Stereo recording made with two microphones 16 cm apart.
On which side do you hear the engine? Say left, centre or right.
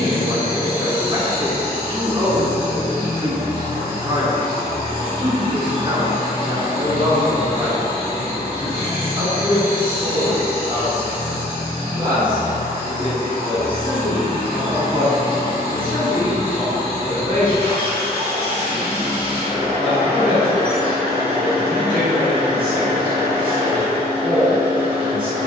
right.